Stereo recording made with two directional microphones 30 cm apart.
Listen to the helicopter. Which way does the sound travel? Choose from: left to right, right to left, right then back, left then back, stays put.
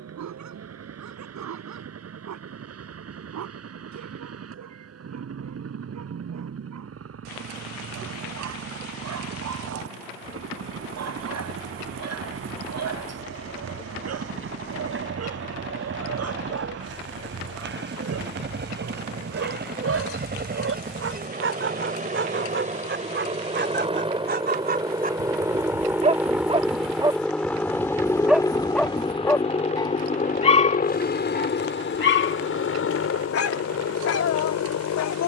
right to left.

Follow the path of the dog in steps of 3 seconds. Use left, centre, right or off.
right, right, right, right, right, right, right, right, right, centre, left, left.